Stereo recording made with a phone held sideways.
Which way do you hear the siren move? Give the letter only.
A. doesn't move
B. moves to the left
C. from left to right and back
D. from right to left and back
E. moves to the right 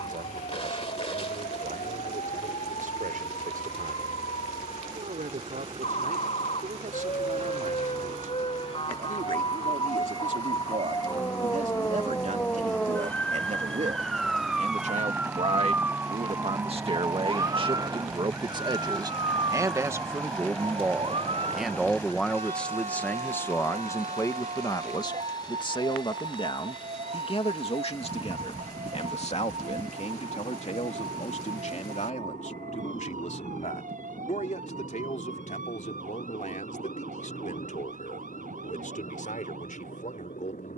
E.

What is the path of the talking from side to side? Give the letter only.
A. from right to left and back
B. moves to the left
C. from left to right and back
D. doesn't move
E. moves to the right
B.